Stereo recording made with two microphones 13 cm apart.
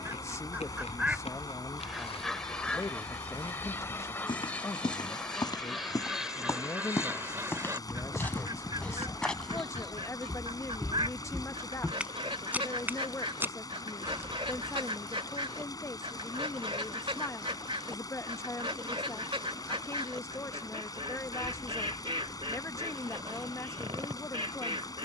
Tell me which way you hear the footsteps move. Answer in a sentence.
In this clip you hear the footsteps move from left to right.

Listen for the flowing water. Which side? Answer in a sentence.
You can hear the flowing water on the left.